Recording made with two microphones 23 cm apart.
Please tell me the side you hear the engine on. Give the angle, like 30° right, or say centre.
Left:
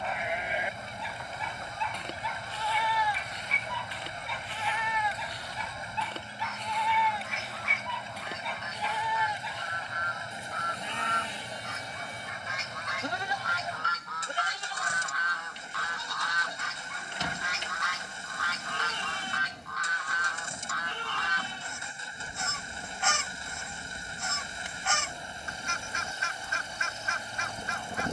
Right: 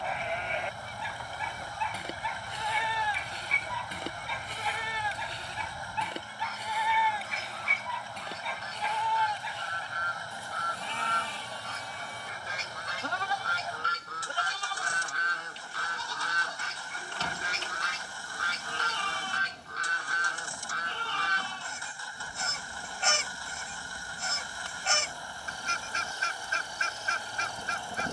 20° left.